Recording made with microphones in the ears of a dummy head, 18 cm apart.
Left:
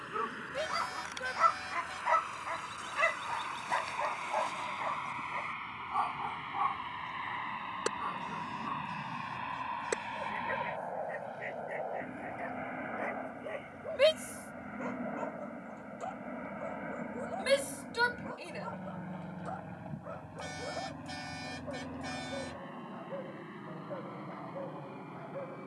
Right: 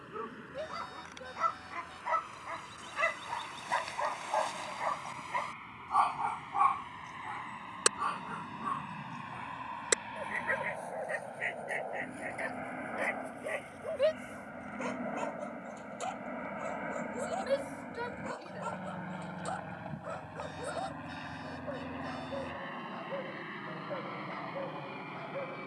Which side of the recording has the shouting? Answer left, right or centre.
left.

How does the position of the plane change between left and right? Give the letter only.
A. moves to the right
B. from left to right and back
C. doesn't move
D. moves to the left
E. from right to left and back
A.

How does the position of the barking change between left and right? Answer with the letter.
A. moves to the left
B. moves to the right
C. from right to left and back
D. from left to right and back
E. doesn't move
B.